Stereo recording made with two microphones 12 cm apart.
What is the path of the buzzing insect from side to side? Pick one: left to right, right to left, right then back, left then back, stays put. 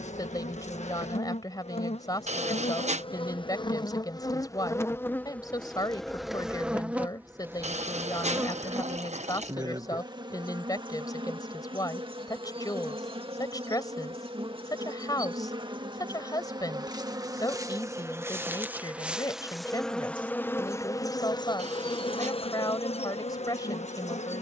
right then back.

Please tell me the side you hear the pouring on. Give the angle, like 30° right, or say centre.
70° right.